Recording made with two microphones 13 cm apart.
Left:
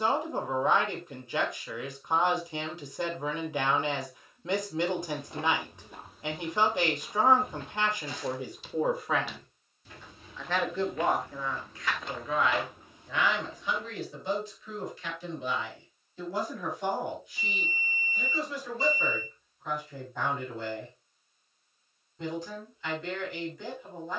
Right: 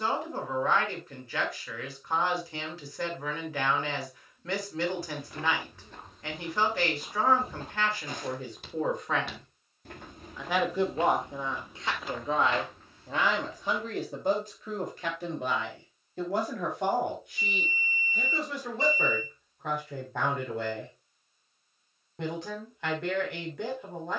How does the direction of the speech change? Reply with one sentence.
In this clip you hear the speech travel towards the right.